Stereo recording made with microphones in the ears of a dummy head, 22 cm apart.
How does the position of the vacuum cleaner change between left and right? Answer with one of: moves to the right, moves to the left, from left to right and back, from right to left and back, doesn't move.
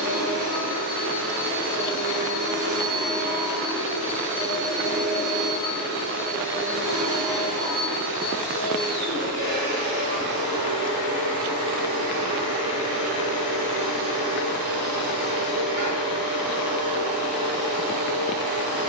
doesn't move.